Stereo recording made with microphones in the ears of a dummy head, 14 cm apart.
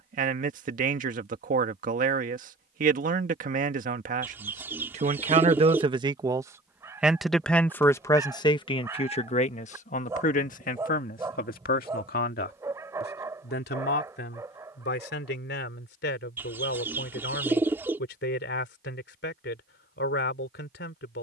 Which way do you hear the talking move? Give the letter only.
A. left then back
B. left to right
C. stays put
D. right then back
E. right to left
E.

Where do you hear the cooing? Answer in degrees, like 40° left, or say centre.
10° right.